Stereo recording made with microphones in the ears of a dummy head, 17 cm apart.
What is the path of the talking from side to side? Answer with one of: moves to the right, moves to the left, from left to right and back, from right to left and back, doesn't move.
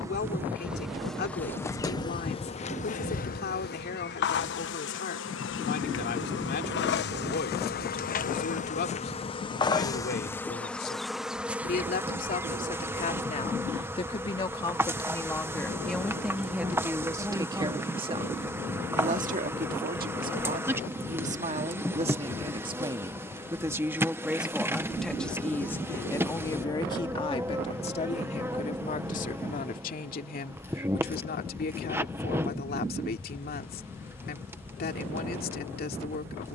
from left to right and back.